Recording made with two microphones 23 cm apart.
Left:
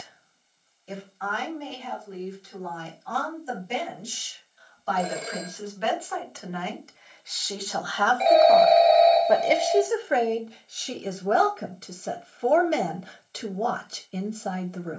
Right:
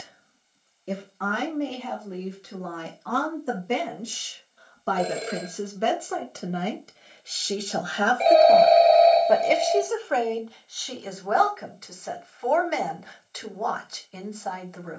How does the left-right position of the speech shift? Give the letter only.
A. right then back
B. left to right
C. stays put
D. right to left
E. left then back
D.